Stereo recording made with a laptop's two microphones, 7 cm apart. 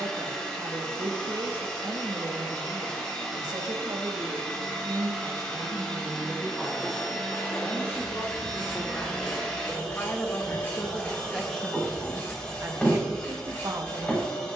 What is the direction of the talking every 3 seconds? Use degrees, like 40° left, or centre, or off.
70° right, 60° right, 20° left, 20° left, 50° right.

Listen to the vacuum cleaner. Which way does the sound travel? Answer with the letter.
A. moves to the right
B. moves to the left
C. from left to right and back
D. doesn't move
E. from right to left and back
D.